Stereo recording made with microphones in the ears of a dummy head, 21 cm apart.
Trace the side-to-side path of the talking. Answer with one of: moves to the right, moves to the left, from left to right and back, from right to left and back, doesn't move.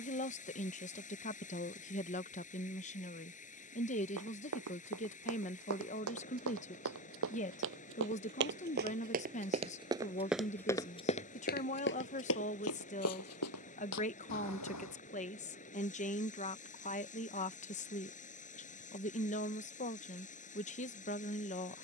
doesn't move.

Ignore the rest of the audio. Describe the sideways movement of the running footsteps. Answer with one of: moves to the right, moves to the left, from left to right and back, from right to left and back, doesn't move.
moves to the left.